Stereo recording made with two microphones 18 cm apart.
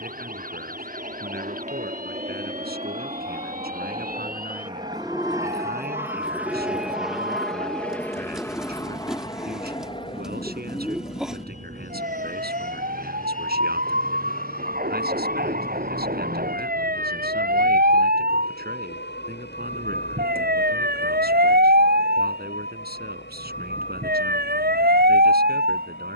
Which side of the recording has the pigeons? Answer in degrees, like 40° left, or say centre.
centre.